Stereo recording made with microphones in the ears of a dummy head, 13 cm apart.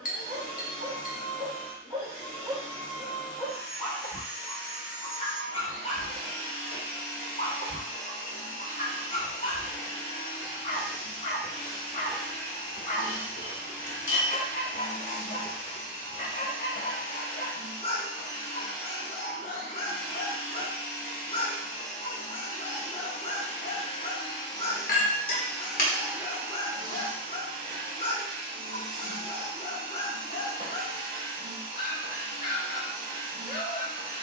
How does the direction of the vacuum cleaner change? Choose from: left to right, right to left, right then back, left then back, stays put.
left to right.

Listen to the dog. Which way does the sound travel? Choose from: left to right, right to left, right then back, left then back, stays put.
right to left.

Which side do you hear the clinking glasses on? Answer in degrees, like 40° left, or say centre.
60° left.